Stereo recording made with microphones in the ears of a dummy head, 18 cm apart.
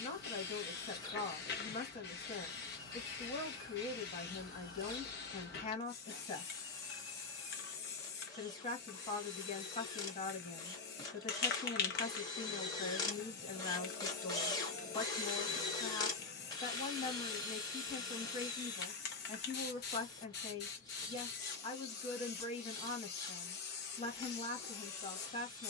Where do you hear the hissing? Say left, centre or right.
left.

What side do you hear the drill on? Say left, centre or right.
left.